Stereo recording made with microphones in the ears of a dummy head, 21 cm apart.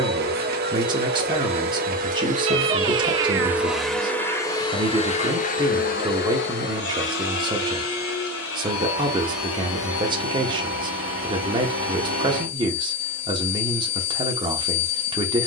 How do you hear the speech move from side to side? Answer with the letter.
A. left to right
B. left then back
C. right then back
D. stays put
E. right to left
D.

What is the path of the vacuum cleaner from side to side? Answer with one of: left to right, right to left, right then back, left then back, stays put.
right to left.